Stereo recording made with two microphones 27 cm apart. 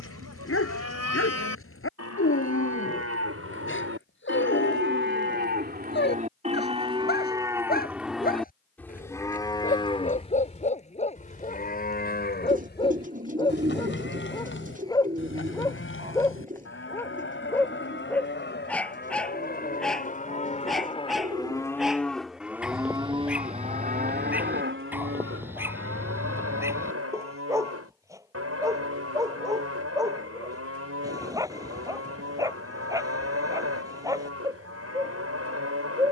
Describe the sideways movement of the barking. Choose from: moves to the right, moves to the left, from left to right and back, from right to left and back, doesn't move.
moves to the right.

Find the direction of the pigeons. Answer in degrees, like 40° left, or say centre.
30° right.